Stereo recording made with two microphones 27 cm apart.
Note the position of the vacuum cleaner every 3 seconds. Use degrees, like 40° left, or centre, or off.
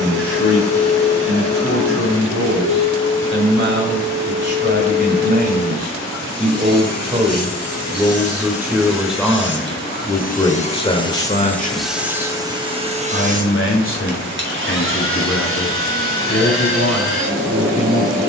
80° left, 70° left, 60° left, 30° left, 30° right, 50° right.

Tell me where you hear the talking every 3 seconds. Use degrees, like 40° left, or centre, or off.
50° right, 40° right, 20° right, 10° left, 50° left, 60° left.